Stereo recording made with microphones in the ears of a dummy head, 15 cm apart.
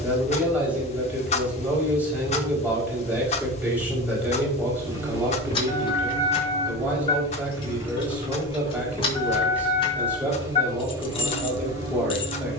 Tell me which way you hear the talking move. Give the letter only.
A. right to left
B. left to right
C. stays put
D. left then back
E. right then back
C.